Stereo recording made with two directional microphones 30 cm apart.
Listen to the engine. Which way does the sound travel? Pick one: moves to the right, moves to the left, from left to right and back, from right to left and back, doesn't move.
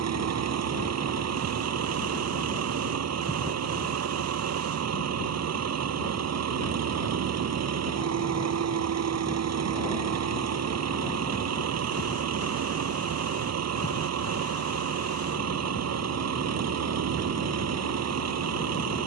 doesn't move.